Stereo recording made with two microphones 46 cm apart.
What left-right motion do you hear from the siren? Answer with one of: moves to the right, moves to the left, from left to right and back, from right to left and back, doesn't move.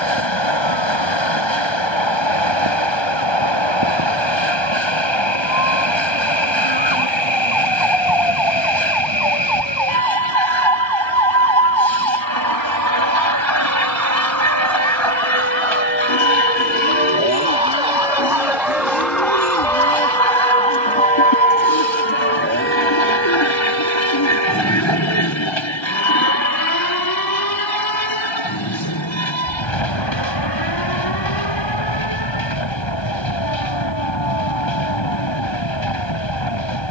moves to the left.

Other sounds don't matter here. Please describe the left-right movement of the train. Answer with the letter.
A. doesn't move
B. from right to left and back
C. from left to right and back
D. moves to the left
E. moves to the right
A.